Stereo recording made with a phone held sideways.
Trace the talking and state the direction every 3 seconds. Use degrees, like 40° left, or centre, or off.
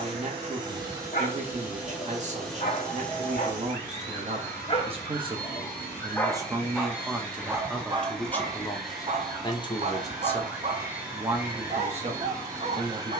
40° right, 40° right, centre, centre, 40° right.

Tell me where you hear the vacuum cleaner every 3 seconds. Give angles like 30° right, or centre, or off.
10° right, 20° left, 10° left, 10° right, 20° right.